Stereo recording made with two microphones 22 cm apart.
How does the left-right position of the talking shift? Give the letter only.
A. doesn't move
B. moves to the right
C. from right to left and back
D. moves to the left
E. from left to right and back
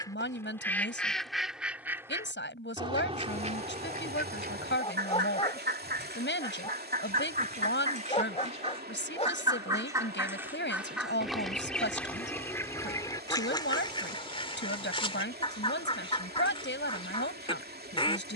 A.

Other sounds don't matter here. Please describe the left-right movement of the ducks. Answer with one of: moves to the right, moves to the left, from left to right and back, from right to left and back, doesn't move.
from left to right and back.